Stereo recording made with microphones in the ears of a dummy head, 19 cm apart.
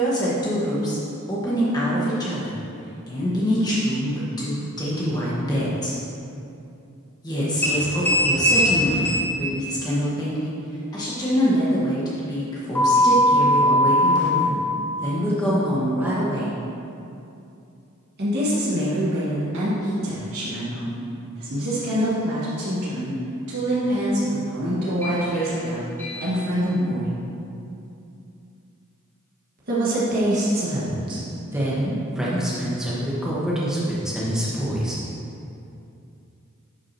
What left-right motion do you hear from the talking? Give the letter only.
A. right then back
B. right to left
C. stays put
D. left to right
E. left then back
A.